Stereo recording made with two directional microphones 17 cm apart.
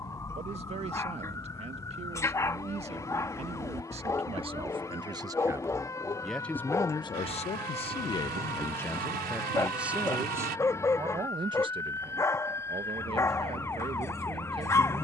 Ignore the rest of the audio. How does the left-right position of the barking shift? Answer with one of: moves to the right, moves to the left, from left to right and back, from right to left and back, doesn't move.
doesn't move.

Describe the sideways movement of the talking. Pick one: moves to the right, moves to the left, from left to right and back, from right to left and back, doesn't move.
from right to left and back.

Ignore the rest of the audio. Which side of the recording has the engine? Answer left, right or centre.
right.